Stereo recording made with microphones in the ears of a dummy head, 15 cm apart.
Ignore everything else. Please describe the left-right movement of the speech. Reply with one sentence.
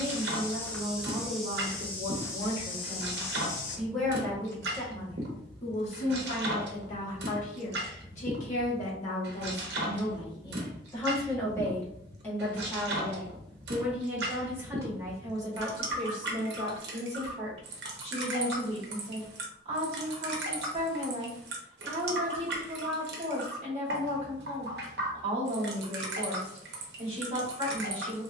You can hear the speech go left and come back.